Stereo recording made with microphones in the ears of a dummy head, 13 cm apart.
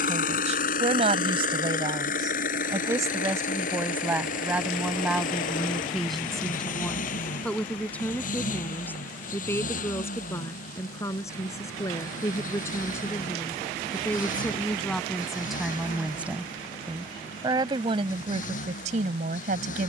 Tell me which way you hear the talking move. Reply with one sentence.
In this clip you hear the talking move from right to left and back again.